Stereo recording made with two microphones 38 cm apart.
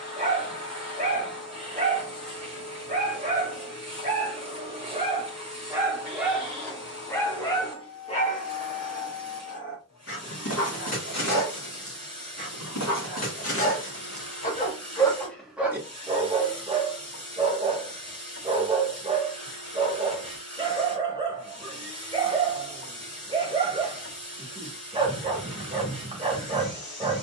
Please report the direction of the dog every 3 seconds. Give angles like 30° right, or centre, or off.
20° right, 20° right, 10° left, 40° left, 40° left, 10° right, 10° right, 10° right, 10° right.